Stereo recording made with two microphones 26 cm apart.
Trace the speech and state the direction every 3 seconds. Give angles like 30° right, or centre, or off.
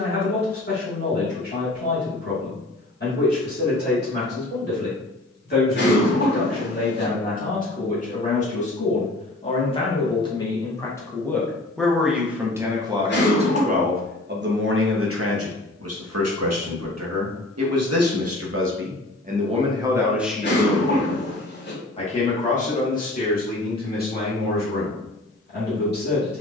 40° left, 40° left, 30° left, 10° left, 30° right, 70° right, 20° right, 30° left, 40° left.